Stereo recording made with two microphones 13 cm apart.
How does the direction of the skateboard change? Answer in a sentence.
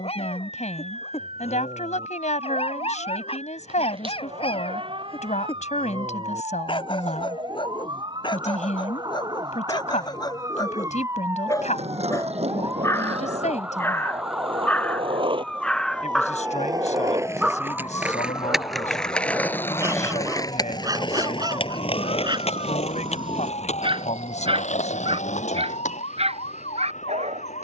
In this clip you hear the skateboard move to the left.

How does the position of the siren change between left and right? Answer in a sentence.
You can hear the siren go from the right side to the left.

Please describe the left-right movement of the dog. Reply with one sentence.
You can hear the dog go from the left side to the right.